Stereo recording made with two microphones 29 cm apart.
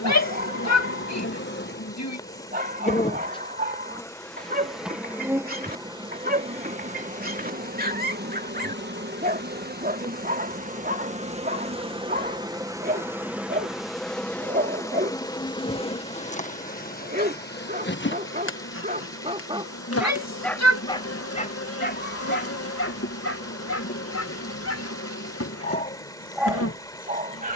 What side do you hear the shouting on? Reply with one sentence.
You can hear the shouting on the left.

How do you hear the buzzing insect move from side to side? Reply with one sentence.
You can hear the buzzing insect go right and come back.